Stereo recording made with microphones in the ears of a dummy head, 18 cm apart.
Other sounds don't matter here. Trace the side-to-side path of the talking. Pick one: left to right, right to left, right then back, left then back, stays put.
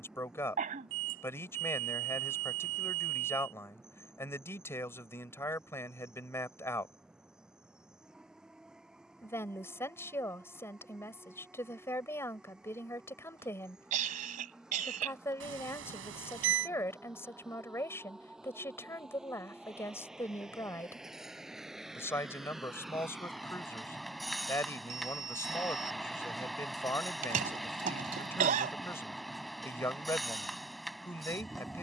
stays put.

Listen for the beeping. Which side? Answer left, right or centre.
right.